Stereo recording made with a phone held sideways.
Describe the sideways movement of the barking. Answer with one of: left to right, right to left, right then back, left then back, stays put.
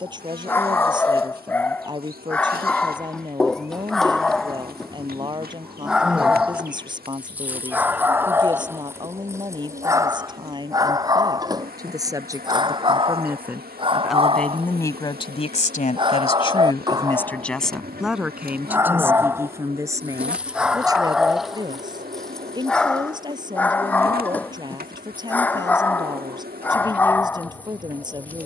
right then back.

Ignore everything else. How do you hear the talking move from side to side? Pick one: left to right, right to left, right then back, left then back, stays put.
left then back.